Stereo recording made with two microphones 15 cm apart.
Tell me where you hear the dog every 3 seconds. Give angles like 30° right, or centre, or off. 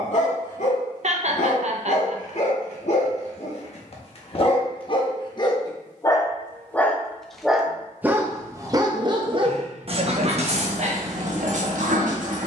60° left, 40° left, 10° right, 50° right.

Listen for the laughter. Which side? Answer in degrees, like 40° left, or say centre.
50° right.